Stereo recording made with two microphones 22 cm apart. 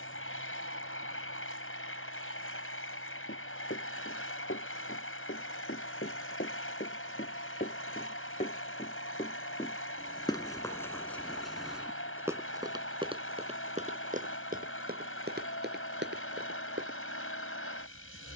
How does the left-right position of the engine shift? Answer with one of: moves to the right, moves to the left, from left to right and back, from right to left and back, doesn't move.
doesn't move.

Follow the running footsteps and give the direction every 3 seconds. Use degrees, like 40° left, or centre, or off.
off, 60° left, 50° left, 10° left, 30° right, 50° right.